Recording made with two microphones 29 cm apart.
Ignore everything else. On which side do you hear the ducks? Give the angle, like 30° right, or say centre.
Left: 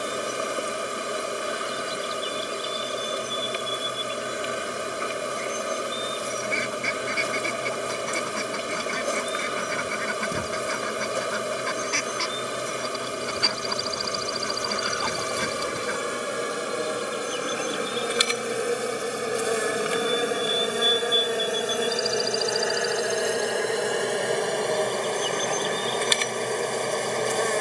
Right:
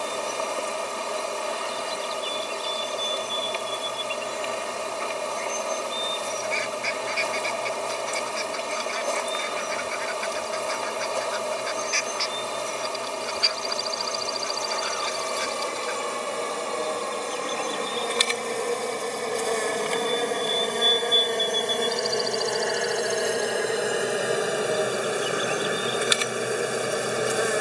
60° left.